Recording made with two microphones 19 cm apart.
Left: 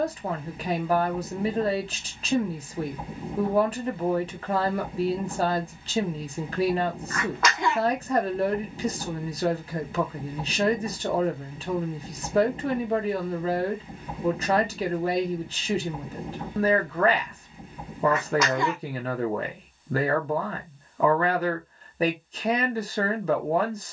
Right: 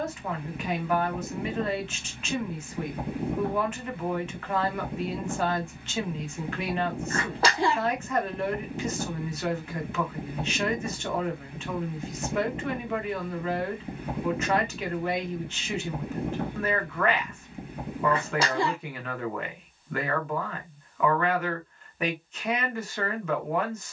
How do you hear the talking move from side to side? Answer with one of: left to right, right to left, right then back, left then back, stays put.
stays put.